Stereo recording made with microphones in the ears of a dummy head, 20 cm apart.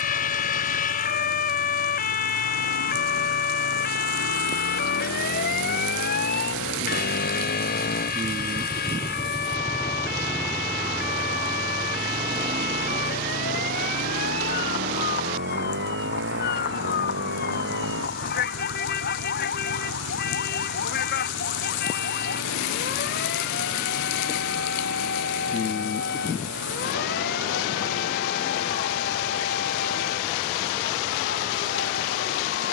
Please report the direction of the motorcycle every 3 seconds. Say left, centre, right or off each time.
left, left, left, centre, right, right, right, right, right, right, right.